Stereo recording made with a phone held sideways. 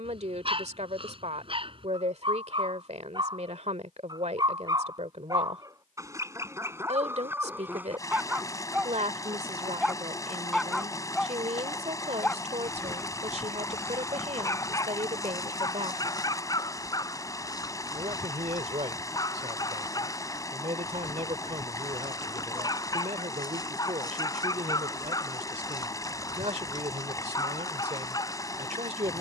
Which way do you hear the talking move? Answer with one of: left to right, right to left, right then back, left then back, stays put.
stays put.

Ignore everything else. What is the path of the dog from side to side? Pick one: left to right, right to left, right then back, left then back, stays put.
right to left.